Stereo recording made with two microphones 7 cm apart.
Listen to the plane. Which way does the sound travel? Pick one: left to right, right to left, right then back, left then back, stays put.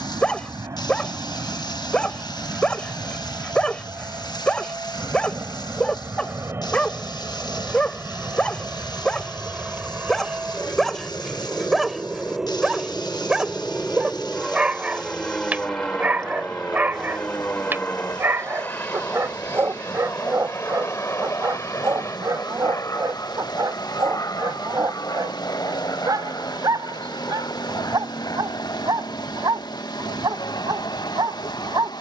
right to left.